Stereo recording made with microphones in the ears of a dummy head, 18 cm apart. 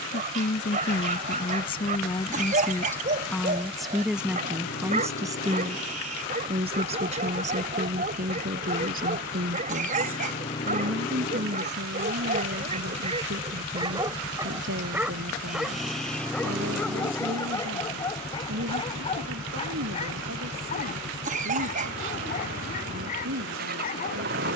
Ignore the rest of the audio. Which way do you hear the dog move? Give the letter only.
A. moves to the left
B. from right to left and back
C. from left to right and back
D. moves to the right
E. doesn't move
A.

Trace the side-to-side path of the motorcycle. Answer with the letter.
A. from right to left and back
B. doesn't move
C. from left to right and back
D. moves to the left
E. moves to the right
E.